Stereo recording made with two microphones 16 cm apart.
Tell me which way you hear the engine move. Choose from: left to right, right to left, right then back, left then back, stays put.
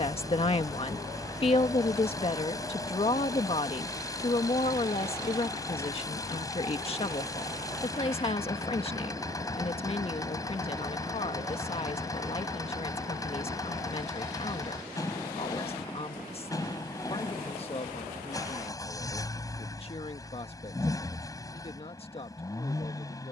stays put.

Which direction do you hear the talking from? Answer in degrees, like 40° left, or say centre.
40° left.